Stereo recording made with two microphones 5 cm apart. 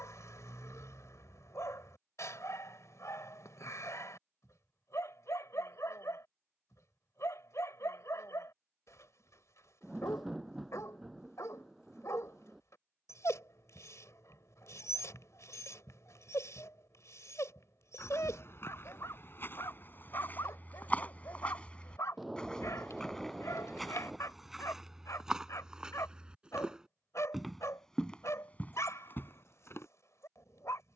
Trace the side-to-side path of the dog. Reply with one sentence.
In this clip you hear the dog stay in one place.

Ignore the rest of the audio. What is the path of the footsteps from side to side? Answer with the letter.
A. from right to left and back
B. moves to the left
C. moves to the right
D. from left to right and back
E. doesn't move
D.